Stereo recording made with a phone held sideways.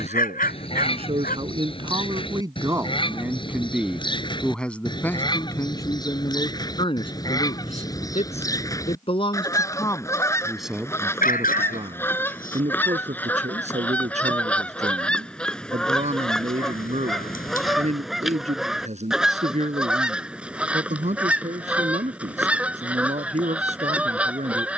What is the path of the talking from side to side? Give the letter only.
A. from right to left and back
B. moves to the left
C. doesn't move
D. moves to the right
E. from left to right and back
A.